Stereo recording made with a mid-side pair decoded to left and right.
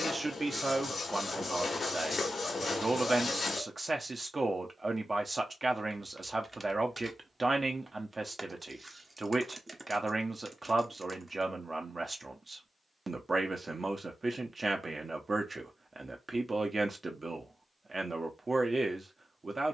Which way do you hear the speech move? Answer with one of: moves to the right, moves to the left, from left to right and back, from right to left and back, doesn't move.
doesn't move.